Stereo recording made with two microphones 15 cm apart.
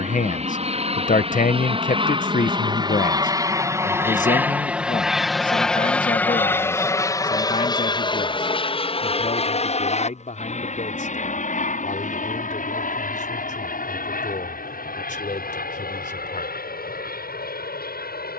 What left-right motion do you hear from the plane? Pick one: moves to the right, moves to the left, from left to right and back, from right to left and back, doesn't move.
moves to the left.